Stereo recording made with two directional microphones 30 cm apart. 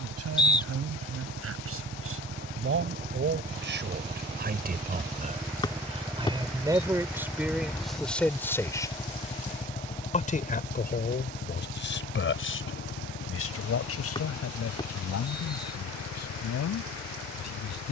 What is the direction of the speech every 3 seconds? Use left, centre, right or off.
right, right, centre, left, left, left.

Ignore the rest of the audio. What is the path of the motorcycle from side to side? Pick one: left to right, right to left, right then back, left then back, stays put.
right to left.